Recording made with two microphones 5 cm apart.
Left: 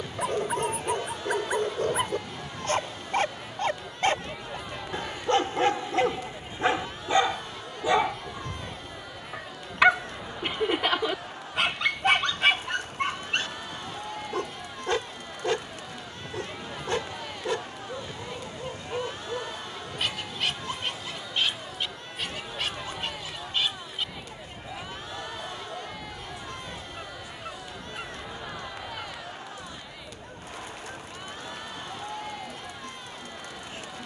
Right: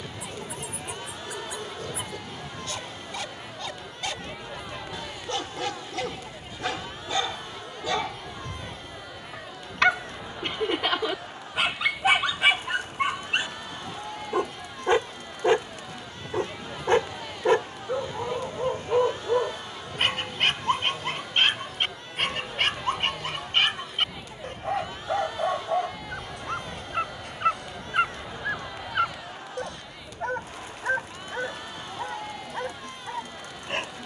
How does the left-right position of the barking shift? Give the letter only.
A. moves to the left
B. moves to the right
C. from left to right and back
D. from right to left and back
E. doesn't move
B.